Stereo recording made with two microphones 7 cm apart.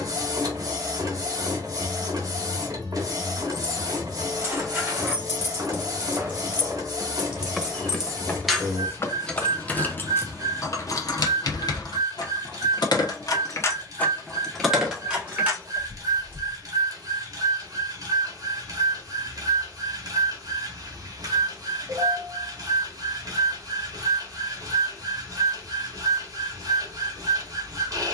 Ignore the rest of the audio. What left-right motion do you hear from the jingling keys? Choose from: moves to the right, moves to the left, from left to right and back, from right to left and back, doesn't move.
from right to left and back.